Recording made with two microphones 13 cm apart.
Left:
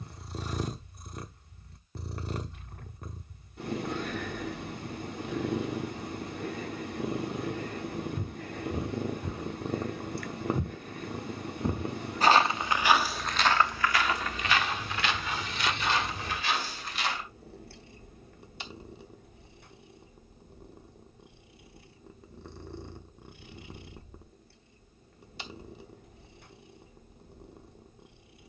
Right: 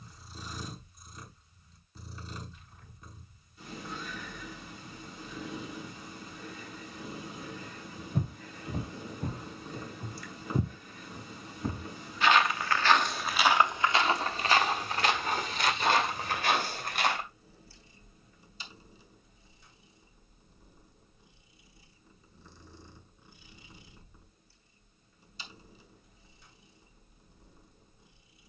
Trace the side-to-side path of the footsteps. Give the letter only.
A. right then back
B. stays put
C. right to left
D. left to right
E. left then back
E.